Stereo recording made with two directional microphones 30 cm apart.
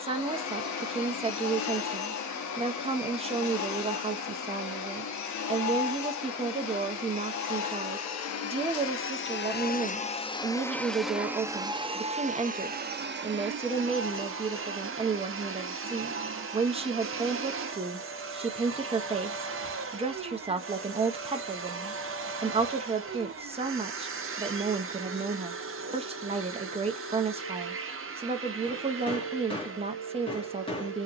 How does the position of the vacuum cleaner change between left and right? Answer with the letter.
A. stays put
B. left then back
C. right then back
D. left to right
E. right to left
D.